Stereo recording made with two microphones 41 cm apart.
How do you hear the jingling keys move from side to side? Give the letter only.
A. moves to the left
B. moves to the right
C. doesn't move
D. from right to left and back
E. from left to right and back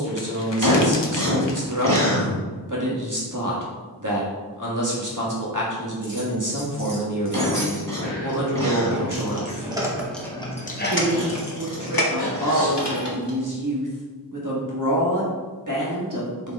A.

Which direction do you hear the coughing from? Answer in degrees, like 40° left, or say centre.
50° right.